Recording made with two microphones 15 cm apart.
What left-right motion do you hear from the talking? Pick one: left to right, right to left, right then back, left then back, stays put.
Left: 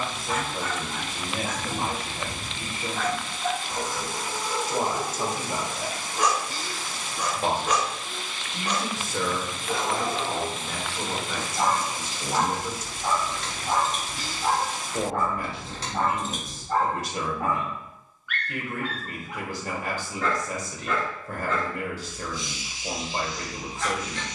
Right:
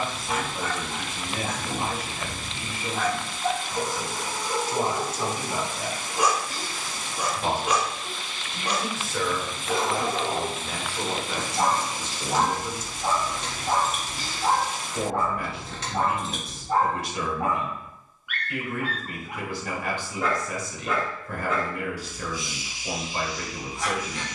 right then back.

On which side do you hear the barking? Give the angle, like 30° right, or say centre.
10° right.